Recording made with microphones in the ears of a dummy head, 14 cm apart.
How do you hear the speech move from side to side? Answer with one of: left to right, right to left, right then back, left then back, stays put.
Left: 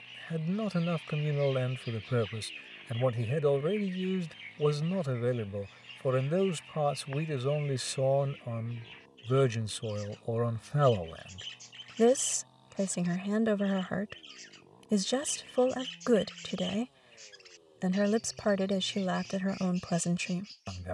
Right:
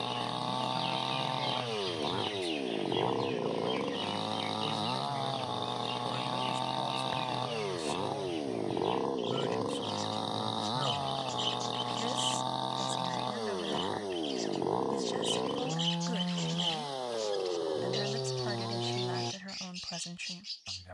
stays put.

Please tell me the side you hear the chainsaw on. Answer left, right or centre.
right.